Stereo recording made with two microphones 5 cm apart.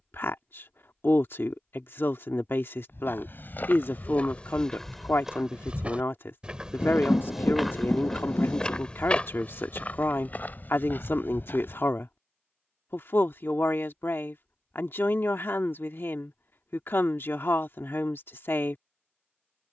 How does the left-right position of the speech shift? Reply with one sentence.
In this clip you hear the speech stay put.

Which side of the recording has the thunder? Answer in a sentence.
You can hear the thunder on the left.